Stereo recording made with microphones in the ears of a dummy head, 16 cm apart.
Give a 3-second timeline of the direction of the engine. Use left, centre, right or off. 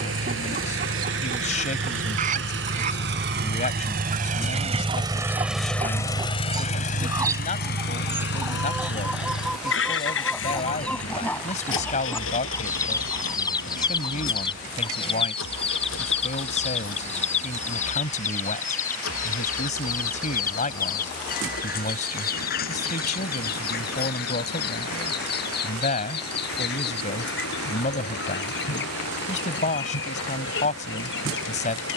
right, right, left, left, left, left, left, left, left, left, left.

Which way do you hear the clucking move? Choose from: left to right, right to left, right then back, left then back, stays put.
right to left.